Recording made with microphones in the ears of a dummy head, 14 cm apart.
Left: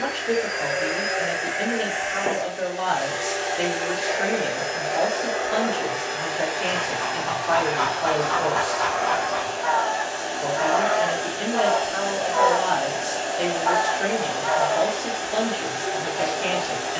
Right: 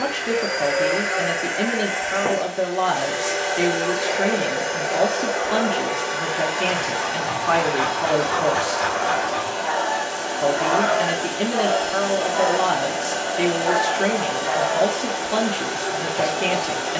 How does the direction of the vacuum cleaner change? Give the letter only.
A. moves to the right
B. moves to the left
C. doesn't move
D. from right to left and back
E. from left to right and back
C.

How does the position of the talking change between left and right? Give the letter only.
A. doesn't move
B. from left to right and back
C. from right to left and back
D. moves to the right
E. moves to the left
A.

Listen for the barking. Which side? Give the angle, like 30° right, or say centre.
10° right.